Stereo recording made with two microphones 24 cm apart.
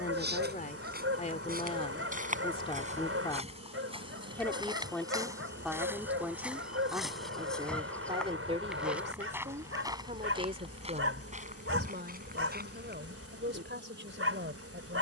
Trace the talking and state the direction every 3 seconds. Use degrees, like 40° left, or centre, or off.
30° left, 10° left, 20° right, 40° right, 50° right.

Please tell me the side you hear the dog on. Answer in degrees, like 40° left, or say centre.
60° right.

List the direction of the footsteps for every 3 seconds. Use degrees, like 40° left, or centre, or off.
40° right, 20° right, centre, 20° right, 40° right.